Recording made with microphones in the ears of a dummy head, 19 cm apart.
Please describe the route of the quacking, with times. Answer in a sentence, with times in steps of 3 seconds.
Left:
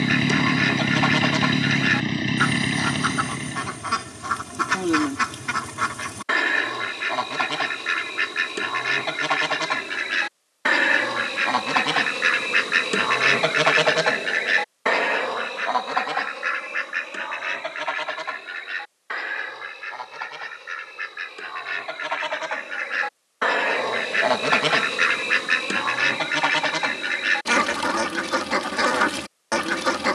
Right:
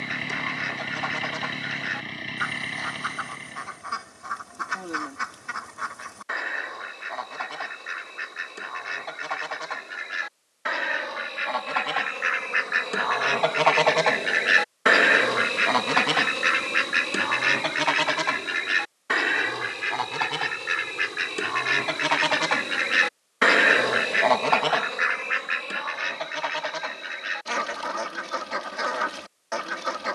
You can hear the quacking on the left from 0 s, on the right from 15 s and on the left from 24 s.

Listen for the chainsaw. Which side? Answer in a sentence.
You can hear the chainsaw on the left.